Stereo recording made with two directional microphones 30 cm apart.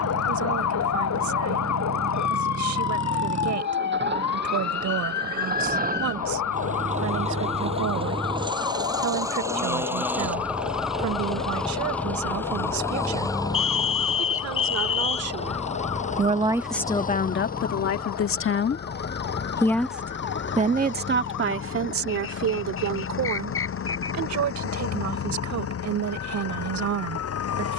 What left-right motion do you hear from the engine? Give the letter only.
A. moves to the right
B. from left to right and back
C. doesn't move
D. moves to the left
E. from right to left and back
D.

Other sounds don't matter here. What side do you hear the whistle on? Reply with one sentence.
In this clip you hear the whistle on the left.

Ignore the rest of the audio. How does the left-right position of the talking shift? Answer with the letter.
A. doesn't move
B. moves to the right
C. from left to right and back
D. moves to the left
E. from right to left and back
E.